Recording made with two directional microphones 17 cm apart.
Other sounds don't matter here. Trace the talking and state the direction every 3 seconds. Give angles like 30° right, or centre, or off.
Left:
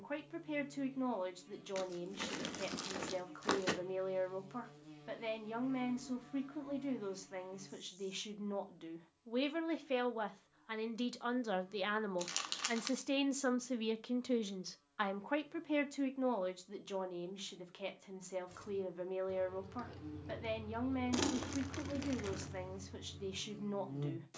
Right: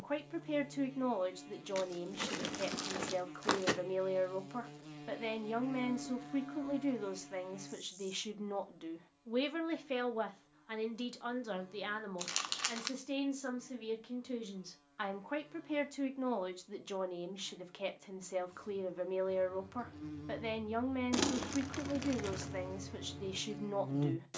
20° right, 20° right, 20° right, centre, 30° left, 10° right, 20° right, 20° right.